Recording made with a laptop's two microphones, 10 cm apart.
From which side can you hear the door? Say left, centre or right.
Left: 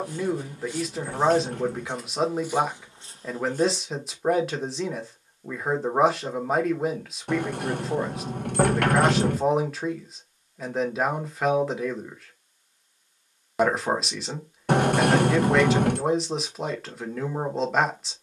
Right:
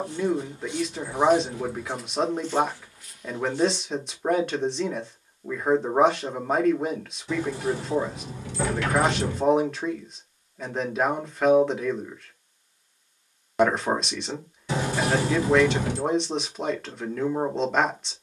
left.